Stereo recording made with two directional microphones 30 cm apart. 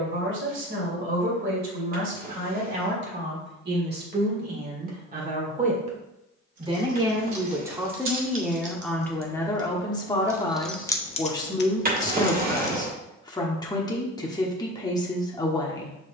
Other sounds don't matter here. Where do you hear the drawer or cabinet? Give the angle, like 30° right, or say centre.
30° right.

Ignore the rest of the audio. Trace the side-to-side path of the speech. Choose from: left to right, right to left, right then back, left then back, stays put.
right to left.